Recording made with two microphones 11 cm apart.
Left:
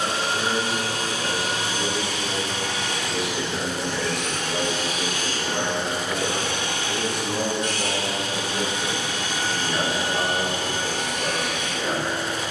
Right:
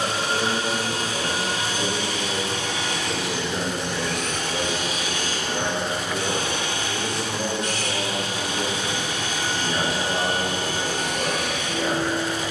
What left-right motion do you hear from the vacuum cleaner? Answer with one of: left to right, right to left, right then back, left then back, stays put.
stays put.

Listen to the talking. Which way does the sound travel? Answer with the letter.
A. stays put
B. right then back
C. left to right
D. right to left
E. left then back
E.